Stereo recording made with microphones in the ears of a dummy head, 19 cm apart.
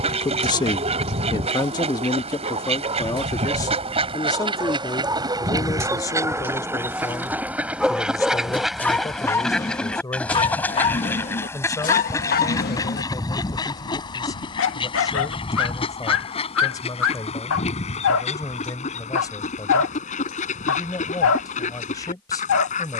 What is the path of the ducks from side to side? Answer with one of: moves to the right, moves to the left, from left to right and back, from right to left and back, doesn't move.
moves to the left.